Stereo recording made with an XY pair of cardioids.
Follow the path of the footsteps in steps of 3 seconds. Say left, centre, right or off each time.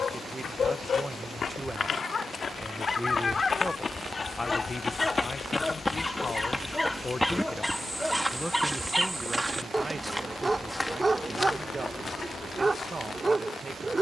left, left, centre, centre, left.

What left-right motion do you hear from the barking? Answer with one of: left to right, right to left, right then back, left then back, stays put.
left to right.